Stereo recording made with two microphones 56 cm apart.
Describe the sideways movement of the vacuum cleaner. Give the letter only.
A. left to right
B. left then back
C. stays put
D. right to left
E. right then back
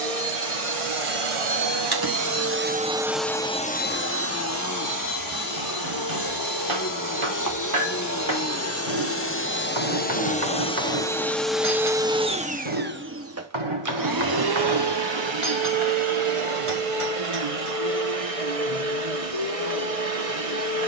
B.